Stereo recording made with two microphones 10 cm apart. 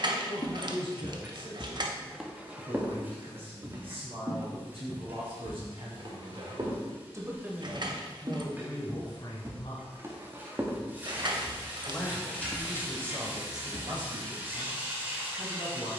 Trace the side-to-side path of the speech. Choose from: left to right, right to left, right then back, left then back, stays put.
left then back.